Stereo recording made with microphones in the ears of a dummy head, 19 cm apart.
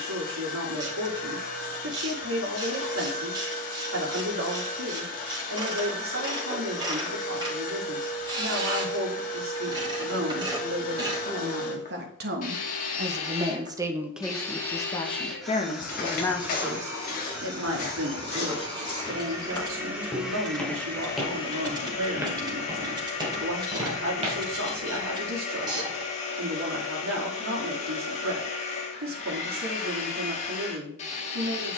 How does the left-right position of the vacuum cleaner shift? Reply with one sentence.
You can hear the vacuum cleaner move from left to right and back again.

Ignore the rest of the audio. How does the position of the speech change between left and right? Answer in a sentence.
In this clip you hear the speech go left and come back.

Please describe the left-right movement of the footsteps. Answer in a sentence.
In this clip you hear the footsteps move to the right.